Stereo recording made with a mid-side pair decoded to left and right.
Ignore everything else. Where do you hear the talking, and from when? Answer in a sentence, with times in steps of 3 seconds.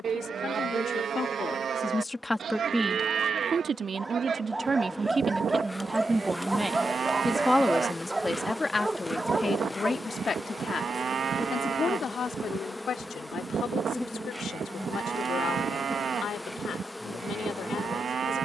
In this clip you hear the talking on the left from 0 s, on the right from 3 s, in the centre from 6 s and on the left from 9 s.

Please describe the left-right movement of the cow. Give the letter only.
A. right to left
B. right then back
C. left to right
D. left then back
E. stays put
E.